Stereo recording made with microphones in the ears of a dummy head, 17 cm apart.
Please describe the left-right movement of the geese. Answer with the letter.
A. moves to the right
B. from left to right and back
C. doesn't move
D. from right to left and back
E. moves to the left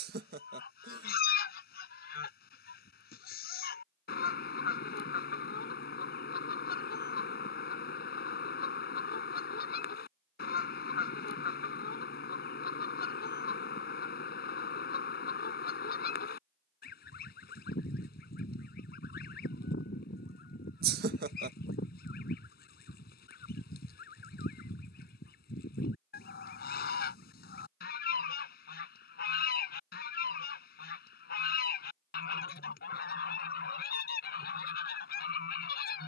C.